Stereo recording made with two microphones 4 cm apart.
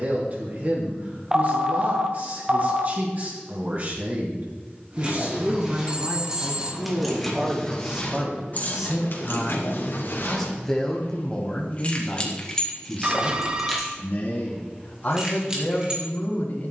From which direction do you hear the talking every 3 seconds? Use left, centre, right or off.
right, right, right, centre, left, left.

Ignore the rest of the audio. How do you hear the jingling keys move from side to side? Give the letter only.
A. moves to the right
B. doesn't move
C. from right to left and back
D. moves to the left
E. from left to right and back
C.